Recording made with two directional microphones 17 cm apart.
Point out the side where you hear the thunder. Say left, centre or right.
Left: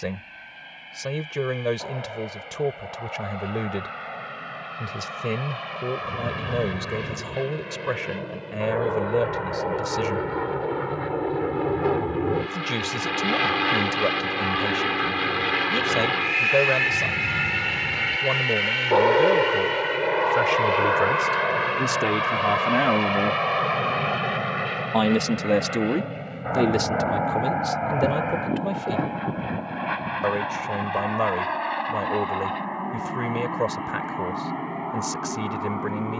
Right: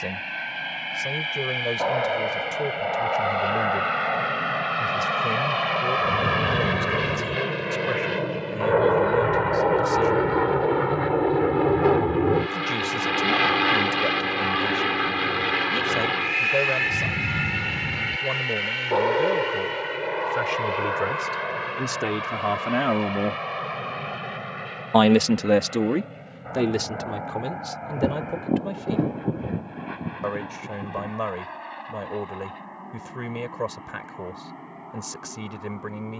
right.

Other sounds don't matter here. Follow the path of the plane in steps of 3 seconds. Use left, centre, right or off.
right, right, right, right, centre, centre, left, left, left, left, left, left.